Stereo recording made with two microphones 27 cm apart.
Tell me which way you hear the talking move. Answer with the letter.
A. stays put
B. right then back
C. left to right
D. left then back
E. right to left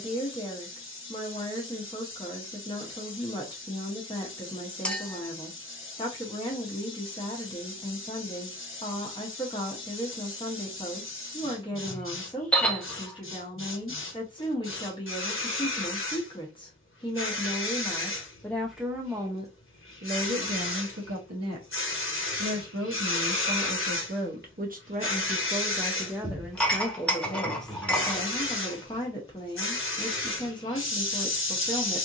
B.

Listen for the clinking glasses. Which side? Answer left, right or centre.
centre.